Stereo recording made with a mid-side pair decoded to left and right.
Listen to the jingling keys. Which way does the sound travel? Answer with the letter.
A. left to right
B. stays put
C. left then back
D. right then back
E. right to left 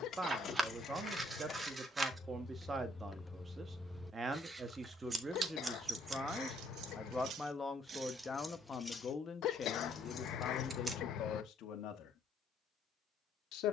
D.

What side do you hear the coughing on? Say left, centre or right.
left.